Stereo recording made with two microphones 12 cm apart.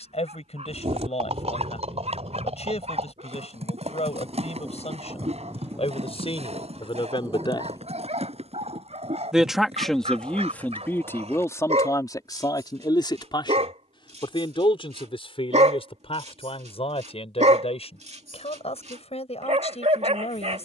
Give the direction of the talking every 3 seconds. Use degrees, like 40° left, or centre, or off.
60° left, 60° left, 50° left, 10° left, 40° left, 50° left, 60° left.